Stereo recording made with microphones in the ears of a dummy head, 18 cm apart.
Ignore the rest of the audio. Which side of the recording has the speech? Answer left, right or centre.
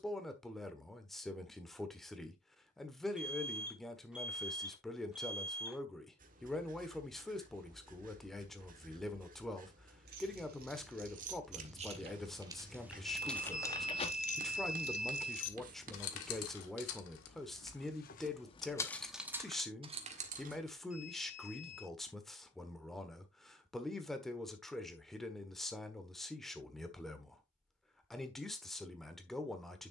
centre.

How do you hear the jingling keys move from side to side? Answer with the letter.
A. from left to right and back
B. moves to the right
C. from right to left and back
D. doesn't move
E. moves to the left
C.